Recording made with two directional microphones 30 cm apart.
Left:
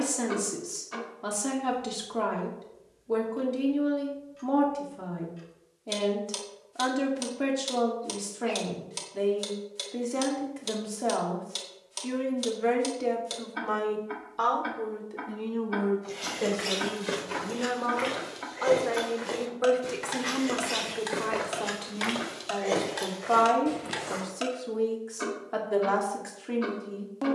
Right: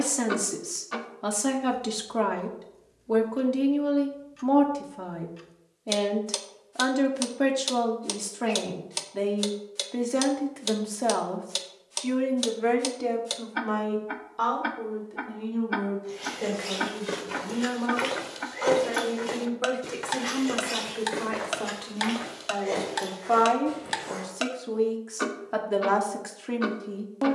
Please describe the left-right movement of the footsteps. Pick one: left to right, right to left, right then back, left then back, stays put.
right then back.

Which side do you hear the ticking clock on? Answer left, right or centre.
right.